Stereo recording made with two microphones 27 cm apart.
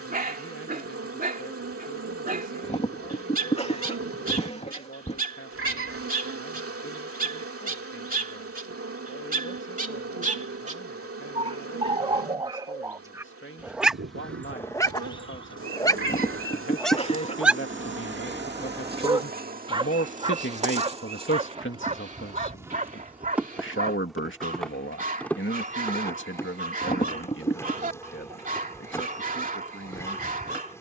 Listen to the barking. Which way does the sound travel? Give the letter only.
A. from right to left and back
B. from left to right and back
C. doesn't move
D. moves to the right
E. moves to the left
A.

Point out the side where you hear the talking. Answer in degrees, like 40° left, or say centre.
50° left.